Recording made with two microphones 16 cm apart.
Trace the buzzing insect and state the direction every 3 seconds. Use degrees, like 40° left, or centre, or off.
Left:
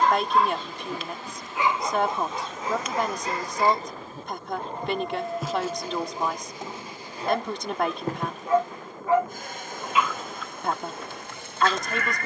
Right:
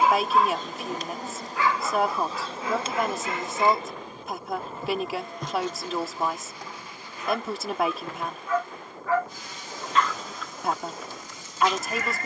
40° right, 10° right, 40° left, 60° left.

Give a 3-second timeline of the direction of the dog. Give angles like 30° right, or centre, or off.
20° left, 50° left, 40° left, centre.